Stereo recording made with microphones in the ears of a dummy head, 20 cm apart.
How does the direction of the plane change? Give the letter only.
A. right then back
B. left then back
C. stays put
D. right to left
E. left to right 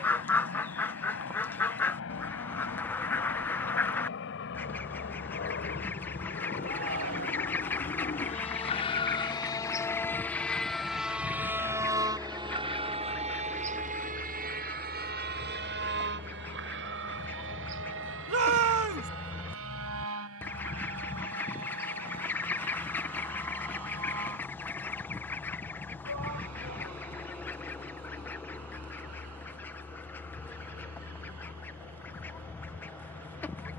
E.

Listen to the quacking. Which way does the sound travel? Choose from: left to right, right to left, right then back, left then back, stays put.
stays put.